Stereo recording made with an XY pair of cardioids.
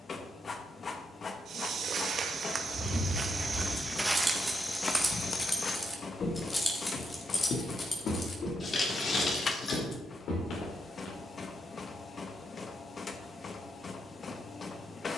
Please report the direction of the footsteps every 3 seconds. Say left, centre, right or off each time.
right, centre, left, left, off.